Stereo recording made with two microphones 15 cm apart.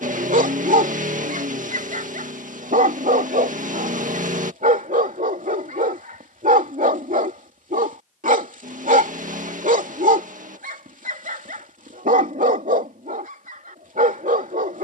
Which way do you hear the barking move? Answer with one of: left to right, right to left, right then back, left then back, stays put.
stays put.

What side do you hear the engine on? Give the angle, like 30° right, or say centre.
60° right.